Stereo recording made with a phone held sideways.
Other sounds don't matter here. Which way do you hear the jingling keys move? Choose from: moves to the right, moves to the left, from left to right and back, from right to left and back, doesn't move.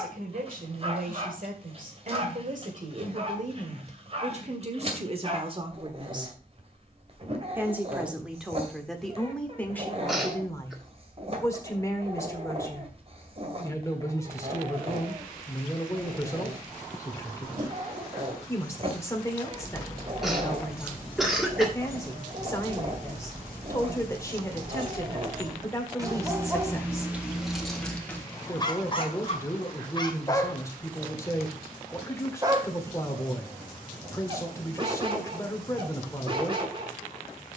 from left to right and back.